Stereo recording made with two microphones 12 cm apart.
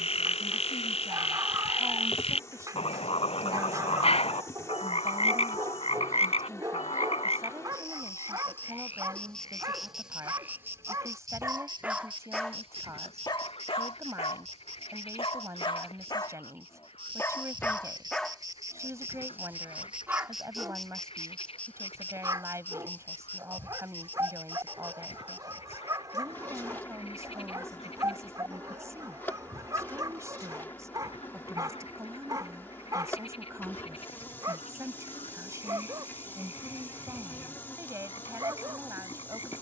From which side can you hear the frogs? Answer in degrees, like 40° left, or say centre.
60° left.